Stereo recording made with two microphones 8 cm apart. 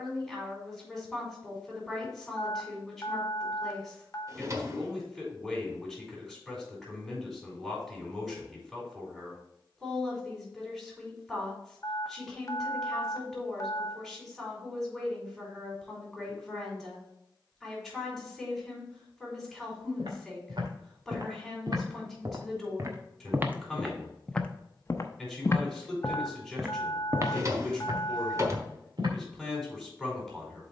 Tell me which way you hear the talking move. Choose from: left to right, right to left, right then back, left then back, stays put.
stays put.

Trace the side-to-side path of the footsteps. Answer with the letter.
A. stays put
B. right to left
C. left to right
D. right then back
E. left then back
E.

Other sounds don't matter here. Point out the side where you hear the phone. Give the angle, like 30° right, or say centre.
40° left.